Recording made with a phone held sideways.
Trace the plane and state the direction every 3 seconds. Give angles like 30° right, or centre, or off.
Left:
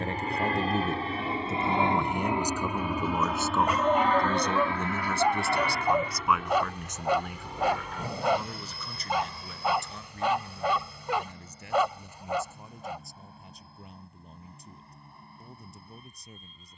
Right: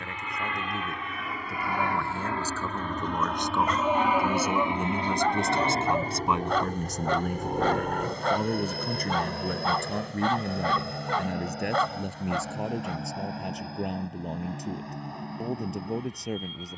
30° left, 10° right, 50° right, 60° right, 70° right, 80° right.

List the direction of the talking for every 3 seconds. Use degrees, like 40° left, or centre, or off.
20° left, 10° right, 40° right, 70° right, 80° right, 80° right.